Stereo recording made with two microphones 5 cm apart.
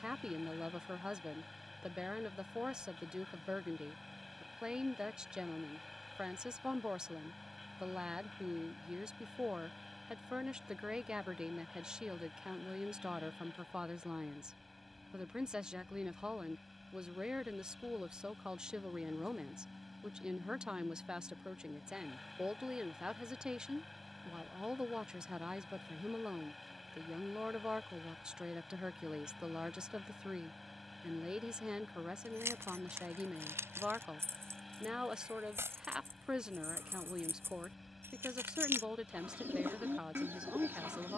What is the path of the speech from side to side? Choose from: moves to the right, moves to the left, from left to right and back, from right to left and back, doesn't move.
doesn't move.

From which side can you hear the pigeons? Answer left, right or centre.
right.